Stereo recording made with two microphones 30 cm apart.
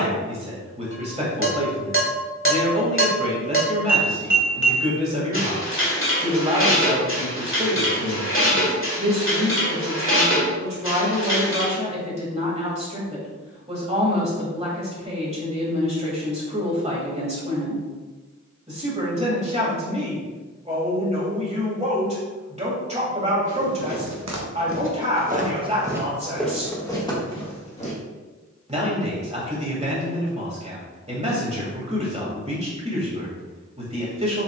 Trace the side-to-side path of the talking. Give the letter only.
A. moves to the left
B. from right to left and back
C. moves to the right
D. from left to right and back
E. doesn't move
E.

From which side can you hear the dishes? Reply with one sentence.
In this clip you hear the dishes on the left.